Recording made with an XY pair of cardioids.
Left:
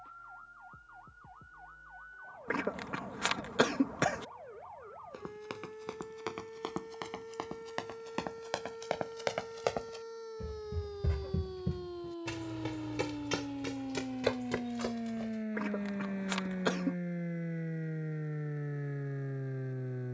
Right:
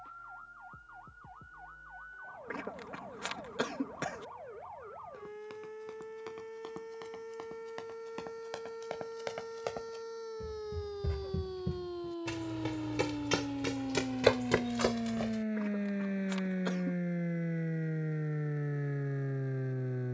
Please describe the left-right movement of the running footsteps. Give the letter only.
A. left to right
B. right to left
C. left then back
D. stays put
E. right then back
A.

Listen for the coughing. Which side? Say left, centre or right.
left.